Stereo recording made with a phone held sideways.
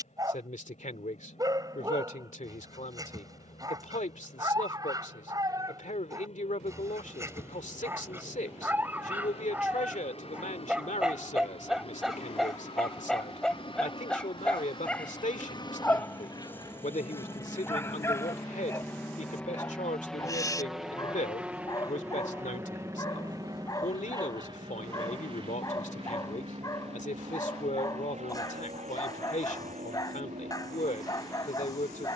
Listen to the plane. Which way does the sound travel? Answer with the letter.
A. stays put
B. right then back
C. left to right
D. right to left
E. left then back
C.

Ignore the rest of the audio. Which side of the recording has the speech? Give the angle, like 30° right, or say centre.
70° left.